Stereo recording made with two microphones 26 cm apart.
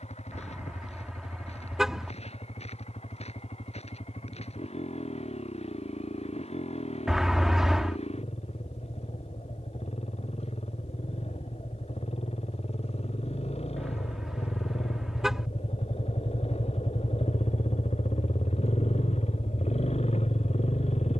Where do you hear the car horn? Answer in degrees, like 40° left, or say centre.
centre.